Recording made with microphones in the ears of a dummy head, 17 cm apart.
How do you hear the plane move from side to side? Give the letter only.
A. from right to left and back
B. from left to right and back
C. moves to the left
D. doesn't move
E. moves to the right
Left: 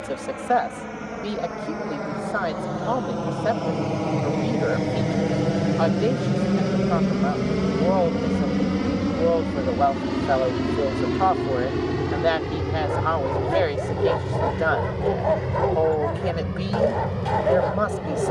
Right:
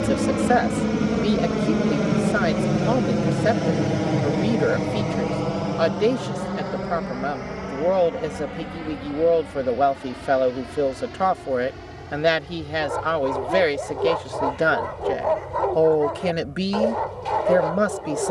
C.